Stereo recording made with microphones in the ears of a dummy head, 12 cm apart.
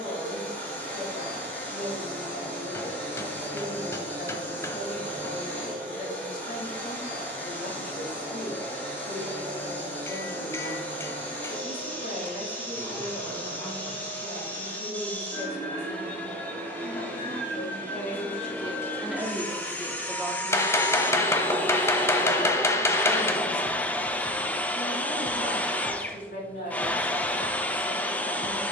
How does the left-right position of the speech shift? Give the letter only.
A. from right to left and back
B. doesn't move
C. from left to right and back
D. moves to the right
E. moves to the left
C.